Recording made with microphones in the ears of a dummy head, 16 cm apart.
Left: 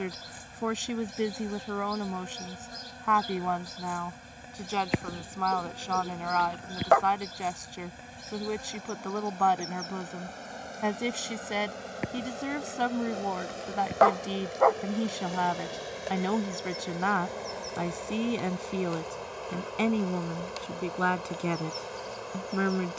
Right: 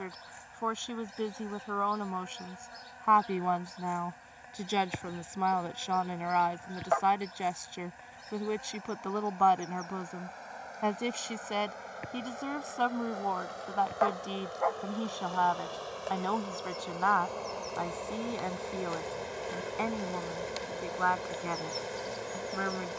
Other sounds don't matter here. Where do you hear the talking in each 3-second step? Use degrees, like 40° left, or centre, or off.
20° left, 10° right, centre, 10° left, 20° left, 20° left, 30° left, 40° left.